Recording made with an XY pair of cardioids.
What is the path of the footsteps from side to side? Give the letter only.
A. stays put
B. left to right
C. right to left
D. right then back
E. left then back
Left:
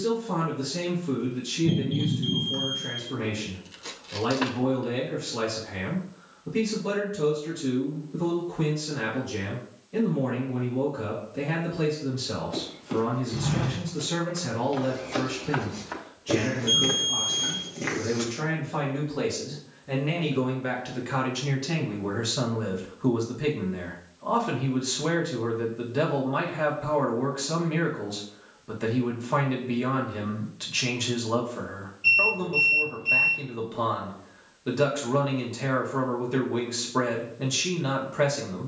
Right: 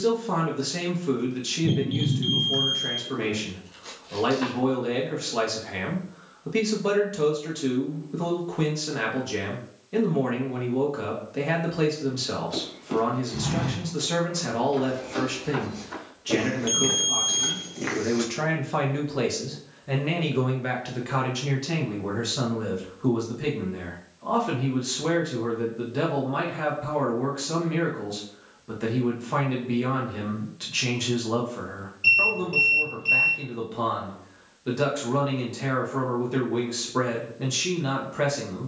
E.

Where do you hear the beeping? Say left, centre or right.
right.